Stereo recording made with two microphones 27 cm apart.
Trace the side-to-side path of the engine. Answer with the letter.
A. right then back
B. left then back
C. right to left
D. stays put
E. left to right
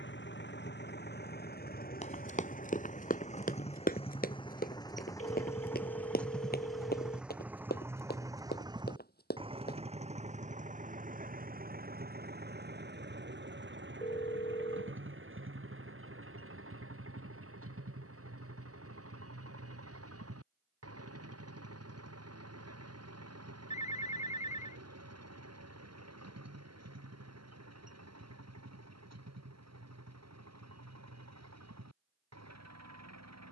E.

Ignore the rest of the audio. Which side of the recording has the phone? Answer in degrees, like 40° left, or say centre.
30° left.